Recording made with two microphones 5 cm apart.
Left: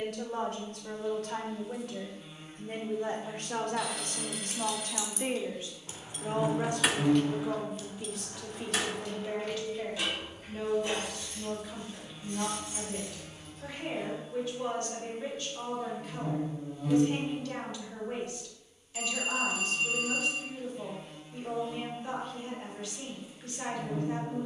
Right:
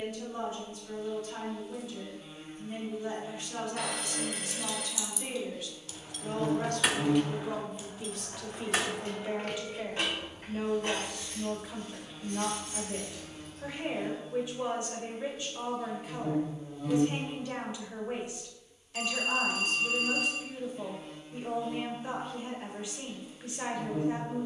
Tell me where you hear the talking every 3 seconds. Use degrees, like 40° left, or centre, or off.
70° left, 50° left, 10° left, 20° right, 20° right, 20° right, 20° right, 20° right.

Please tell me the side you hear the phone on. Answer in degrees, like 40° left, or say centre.
60° right.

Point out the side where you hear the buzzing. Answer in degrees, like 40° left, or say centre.
centre.